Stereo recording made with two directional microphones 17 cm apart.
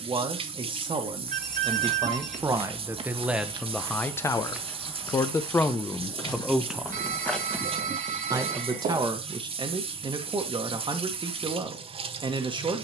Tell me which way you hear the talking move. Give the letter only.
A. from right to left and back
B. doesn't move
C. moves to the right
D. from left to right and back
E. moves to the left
A.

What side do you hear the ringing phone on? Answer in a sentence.
In this clip you hear the ringing phone on the right.